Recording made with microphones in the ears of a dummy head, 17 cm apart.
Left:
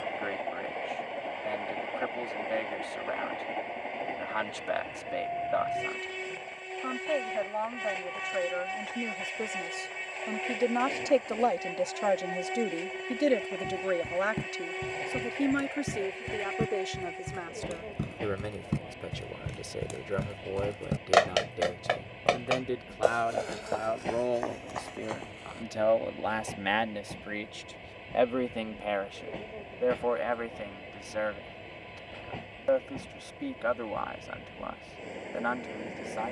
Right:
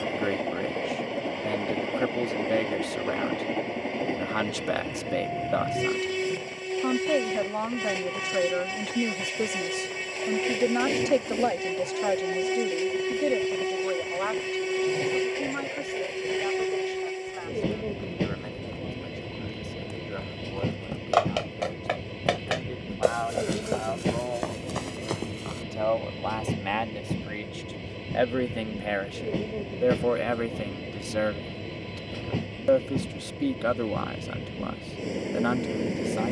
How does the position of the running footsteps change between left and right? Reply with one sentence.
You can hear the running footsteps go from the left side to the right.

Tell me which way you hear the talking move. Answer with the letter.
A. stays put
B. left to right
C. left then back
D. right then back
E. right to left
C.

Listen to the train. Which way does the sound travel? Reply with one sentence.
You can hear the train stay in one place.